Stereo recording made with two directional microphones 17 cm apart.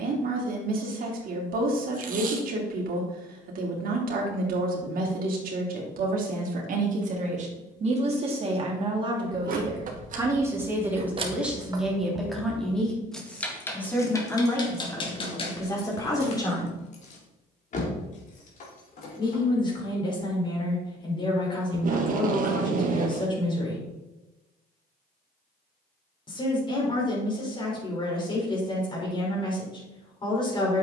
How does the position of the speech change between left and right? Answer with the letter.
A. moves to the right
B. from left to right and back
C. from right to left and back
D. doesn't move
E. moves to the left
E.